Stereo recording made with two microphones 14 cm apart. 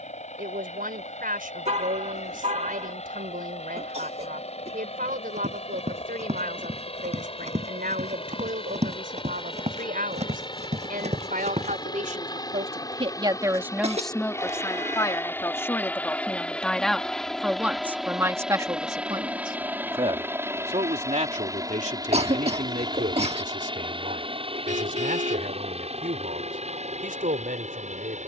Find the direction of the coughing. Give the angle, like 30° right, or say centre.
50° right.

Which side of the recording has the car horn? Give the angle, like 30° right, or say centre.
50° right.